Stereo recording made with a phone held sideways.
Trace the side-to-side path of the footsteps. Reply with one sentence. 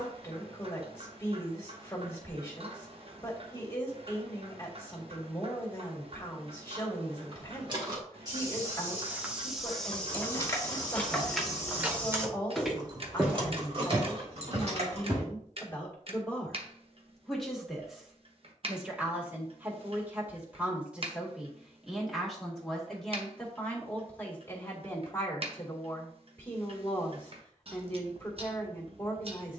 You can hear the footsteps go left and come back.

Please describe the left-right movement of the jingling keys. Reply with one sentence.
In this clip you hear the jingling keys travel towards the right.